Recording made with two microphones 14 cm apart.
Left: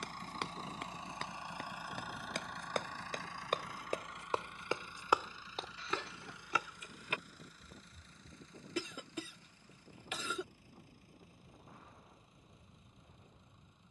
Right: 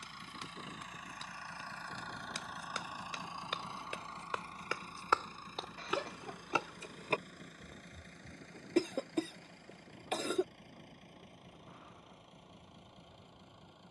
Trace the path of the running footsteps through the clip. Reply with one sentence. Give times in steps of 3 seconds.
You can hear the running footsteps on the left from 0 s, on the right from 6 s and not at all from 9 s.